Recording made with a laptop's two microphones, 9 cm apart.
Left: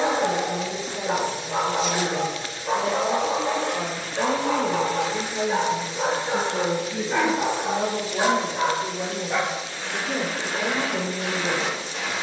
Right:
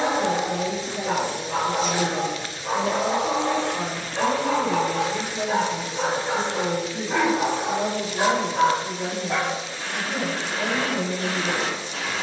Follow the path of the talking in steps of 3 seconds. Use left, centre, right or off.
centre, left, left, left.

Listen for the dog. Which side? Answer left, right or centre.
right.